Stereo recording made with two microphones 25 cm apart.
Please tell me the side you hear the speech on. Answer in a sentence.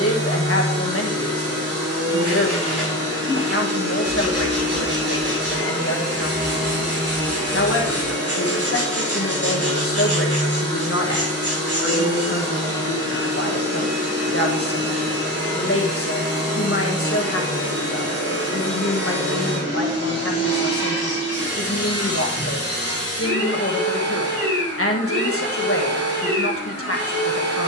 You can hear the speech on the left.